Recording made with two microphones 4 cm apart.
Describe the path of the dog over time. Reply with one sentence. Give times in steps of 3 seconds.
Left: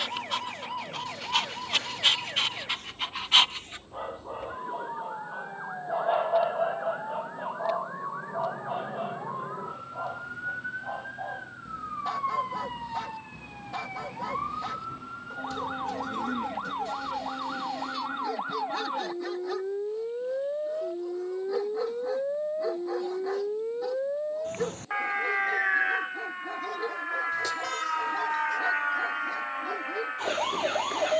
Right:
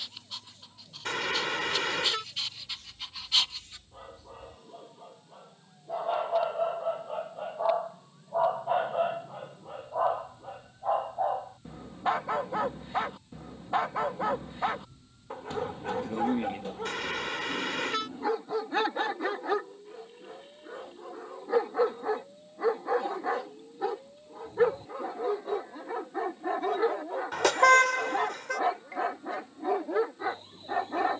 You can hear the dog on the left from 0 s, in the centre from 6 s and on the right from 9 s.